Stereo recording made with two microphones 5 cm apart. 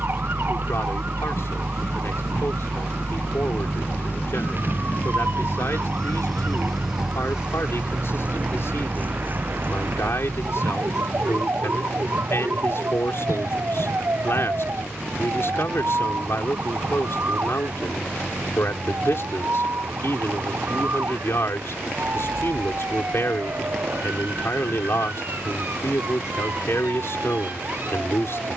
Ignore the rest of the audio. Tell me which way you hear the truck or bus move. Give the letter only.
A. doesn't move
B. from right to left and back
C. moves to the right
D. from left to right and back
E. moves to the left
C.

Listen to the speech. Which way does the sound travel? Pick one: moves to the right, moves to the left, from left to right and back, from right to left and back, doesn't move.
doesn't move.